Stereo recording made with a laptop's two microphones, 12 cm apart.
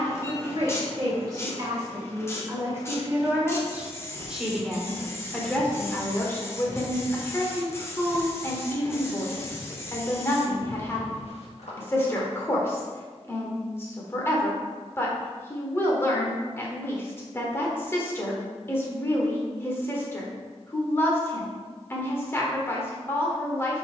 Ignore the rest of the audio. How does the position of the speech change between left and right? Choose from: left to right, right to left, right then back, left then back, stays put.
right to left.